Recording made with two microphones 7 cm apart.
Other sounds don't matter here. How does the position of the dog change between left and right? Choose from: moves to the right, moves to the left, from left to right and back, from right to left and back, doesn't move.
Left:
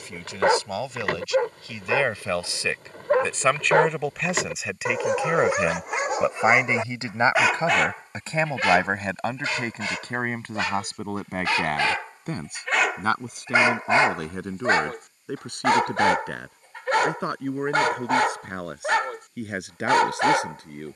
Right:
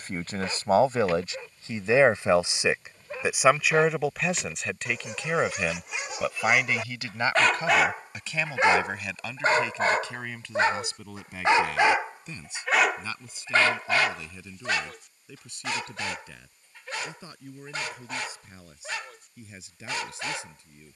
from left to right and back.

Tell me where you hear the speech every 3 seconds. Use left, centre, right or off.
right, centre, left, left, left, left, left.